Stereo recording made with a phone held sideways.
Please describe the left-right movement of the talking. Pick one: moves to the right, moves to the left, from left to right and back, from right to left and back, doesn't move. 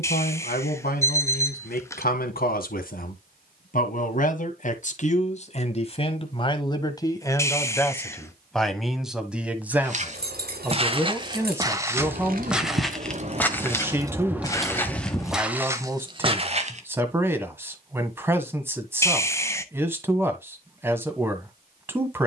moves to the right.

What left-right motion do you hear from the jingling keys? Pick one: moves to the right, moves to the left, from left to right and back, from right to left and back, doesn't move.
moves to the left.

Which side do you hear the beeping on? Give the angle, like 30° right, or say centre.
20° left.